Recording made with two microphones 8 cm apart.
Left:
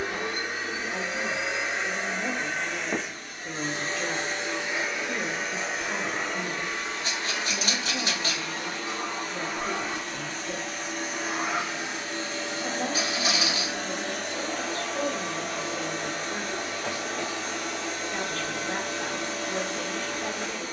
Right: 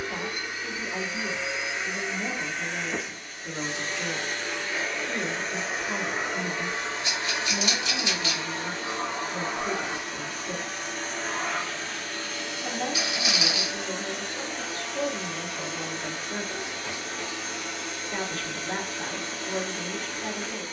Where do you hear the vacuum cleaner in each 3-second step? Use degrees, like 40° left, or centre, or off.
60° left, 20° left, 20° right, centre, 40° left, 60° left, 60° left.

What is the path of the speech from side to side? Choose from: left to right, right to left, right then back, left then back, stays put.
stays put.